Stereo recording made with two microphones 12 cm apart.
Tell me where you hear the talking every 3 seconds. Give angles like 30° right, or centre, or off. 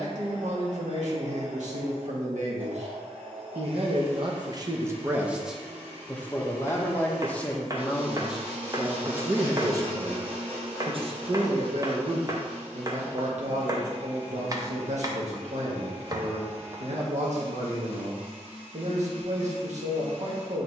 80° right, 30° right, 10° left, 40° right, 70° right, 70° right, 70° right.